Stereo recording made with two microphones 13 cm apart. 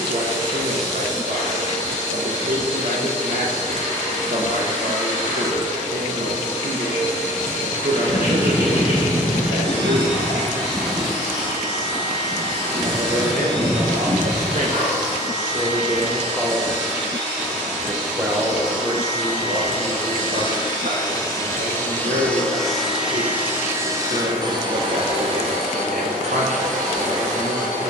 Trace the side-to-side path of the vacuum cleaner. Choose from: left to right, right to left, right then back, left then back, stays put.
left to right.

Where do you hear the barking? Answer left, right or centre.
left.